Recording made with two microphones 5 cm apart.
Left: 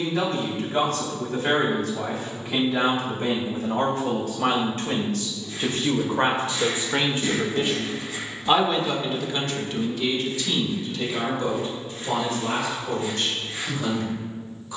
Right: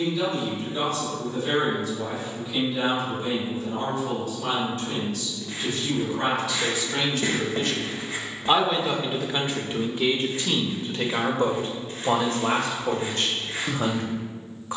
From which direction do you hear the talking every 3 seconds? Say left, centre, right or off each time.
left, left, left, right, right.